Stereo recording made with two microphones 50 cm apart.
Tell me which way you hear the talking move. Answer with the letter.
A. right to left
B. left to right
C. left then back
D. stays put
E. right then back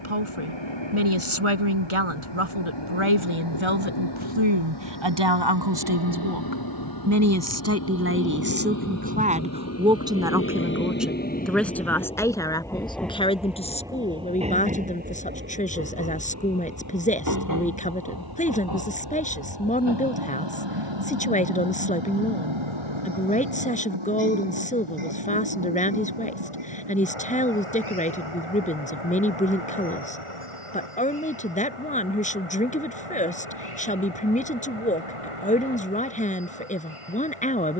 A.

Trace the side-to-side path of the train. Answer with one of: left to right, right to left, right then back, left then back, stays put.
left to right.